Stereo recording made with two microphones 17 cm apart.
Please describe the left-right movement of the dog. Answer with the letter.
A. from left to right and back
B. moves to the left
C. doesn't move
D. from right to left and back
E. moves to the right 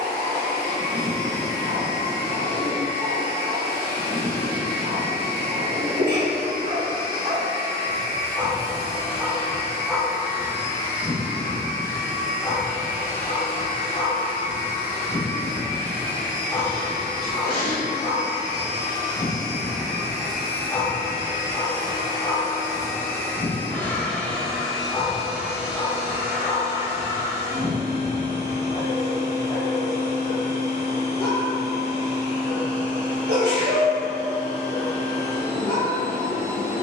B.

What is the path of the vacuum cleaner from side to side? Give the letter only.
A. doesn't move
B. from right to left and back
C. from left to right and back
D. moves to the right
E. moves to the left
D.